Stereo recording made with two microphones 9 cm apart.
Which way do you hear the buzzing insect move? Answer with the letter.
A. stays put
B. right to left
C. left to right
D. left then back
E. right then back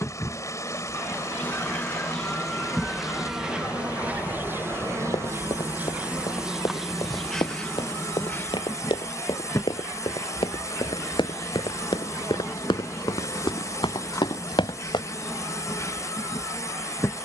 E.